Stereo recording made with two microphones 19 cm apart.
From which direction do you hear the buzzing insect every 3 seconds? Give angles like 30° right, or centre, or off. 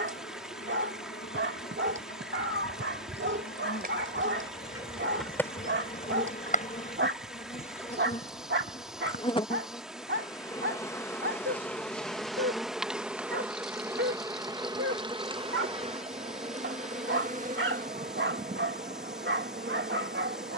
60° left, 50° left, 40° left, 20° left, 10° right, 40° right, 50° right.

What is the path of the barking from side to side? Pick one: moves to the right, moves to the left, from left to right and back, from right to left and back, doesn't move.
doesn't move.